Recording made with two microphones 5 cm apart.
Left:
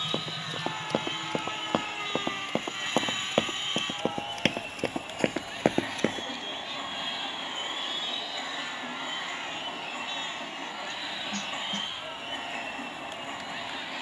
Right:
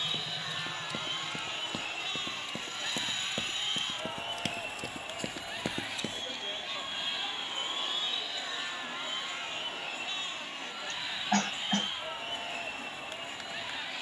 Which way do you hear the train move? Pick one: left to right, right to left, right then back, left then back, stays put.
stays put.